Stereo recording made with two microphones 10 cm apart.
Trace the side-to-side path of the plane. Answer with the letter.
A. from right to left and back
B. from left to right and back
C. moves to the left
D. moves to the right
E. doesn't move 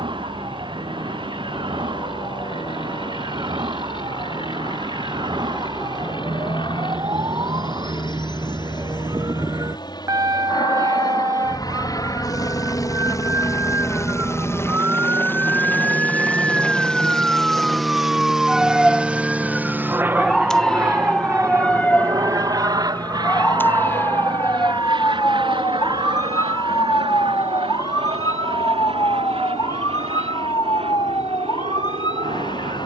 D.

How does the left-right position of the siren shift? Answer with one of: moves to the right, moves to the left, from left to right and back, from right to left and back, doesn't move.
moves to the left.